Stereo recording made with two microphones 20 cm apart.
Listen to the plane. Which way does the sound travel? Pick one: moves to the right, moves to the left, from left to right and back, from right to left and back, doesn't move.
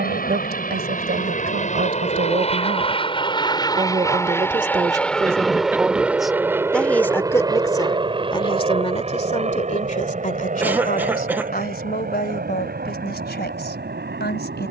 moves to the right.